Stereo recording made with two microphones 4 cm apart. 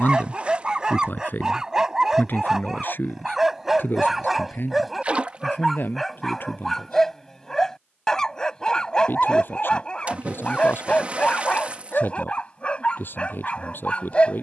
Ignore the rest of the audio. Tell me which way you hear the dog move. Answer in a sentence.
You can hear the dog move to the left.